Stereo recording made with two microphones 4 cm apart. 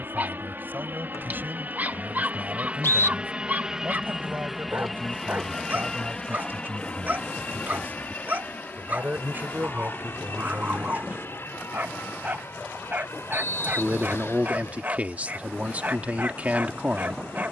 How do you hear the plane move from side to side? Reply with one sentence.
You can hear the plane travel towards the left.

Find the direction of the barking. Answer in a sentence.
In this clip you hear the barking on the right.